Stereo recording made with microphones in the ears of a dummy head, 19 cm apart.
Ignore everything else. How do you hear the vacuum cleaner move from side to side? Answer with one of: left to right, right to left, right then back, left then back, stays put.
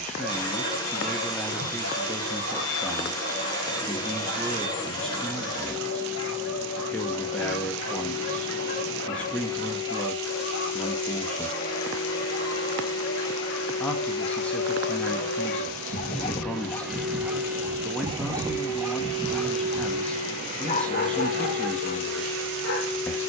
left to right.